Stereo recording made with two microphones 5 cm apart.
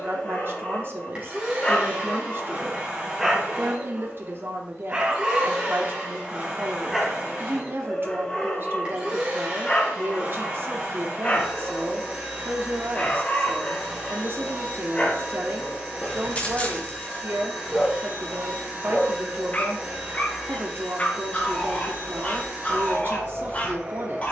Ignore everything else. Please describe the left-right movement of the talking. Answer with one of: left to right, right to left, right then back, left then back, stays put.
stays put.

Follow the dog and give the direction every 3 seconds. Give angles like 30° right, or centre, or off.
20° left, 20° right, 10° left, 30° left, 30° left, 30° left, 30° left, 30° left.